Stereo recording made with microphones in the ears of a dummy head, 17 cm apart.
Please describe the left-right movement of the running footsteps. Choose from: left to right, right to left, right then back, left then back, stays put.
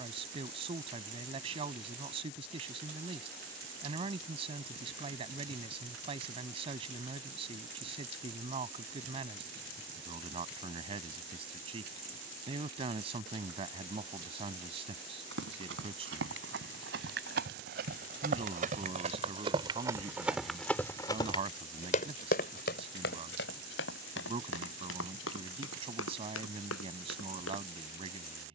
right to left.